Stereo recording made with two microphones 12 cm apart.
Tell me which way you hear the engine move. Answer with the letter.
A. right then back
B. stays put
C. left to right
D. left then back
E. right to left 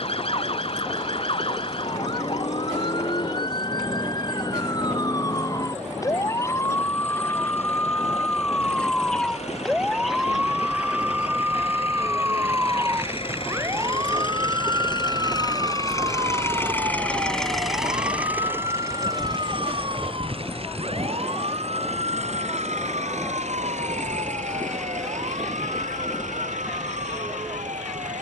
C.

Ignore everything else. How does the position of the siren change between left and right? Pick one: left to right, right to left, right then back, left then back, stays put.
left to right.